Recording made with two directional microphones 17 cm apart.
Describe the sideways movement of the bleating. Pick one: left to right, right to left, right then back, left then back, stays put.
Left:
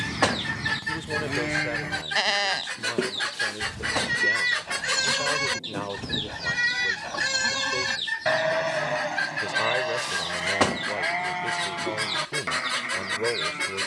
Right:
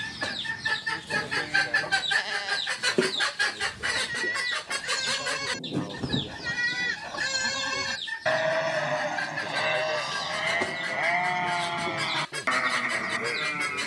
left to right.